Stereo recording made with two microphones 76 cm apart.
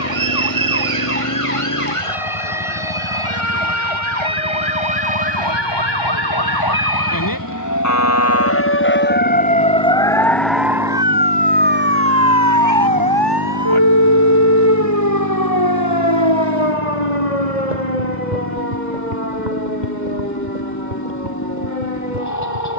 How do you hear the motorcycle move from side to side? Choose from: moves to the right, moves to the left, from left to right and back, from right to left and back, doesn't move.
doesn't move.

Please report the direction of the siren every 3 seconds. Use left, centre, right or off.
left, left, left, centre, right, right, right, right.